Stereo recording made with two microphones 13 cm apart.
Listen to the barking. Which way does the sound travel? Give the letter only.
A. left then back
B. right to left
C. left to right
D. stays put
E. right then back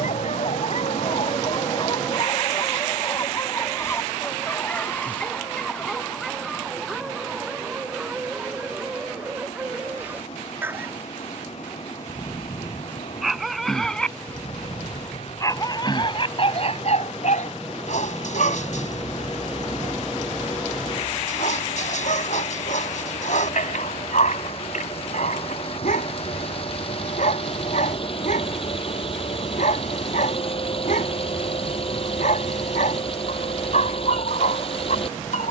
E.